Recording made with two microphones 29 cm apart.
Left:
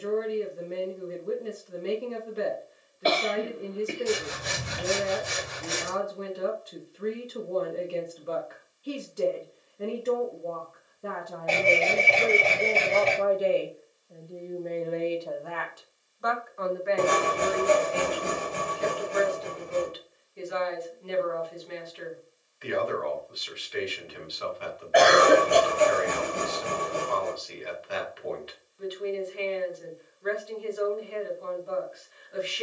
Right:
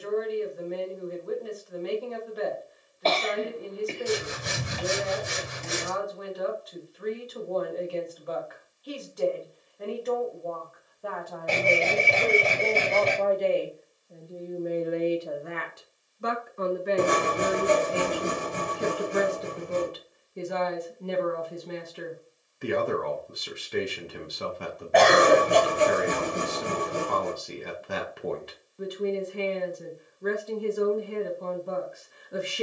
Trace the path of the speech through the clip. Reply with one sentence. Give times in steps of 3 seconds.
You can hear the speech on the left from 0 s, in the centre from 12 s and on the right from 15 s.